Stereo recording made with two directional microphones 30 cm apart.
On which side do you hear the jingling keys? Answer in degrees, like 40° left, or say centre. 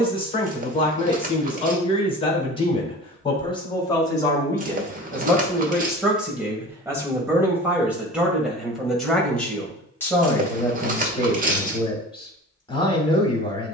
30° right.